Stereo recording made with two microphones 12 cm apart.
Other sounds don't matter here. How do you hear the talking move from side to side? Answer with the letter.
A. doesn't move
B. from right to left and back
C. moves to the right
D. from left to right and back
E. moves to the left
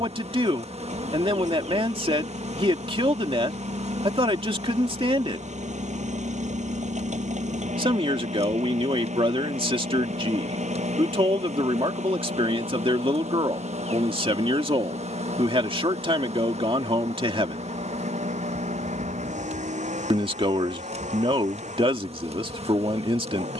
A.